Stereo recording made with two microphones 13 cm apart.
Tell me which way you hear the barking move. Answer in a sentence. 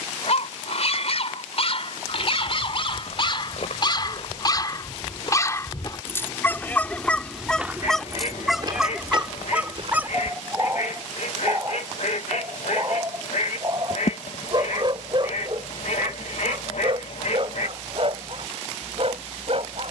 You can hear the barking go from the left side to the right.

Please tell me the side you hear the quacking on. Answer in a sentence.
You can hear the quacking on the left.